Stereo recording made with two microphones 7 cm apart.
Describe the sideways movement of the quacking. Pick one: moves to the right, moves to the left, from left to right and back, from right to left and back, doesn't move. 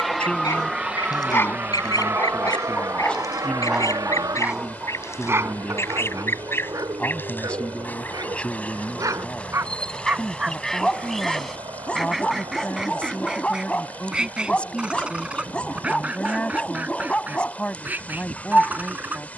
moves to the right.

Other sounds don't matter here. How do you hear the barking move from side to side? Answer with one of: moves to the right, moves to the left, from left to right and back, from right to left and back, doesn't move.
from left to right and back.